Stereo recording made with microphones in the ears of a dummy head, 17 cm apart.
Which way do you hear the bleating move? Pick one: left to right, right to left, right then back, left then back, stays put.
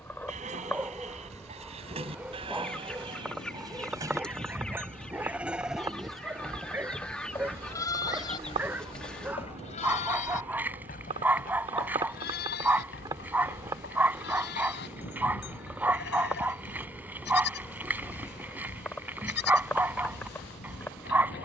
right to left.